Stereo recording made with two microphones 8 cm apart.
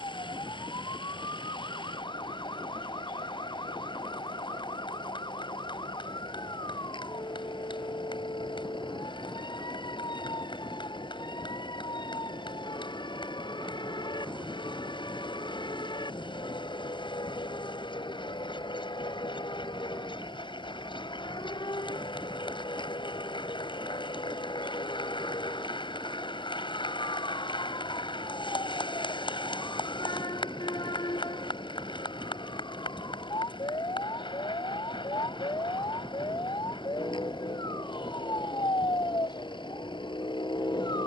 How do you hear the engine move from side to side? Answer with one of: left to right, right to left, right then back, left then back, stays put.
stays put.